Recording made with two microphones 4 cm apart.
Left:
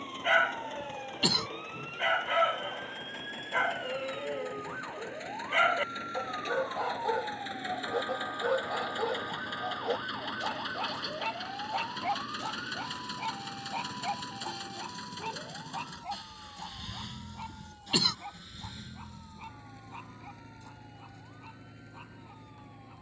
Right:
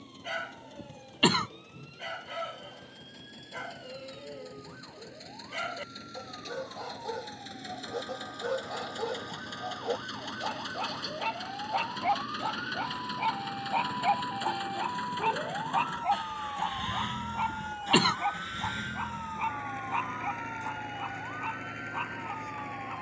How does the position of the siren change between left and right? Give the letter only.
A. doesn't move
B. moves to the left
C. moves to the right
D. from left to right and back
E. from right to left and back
C.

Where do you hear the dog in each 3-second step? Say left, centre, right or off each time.
left, left, left, centre, right, right, right, right.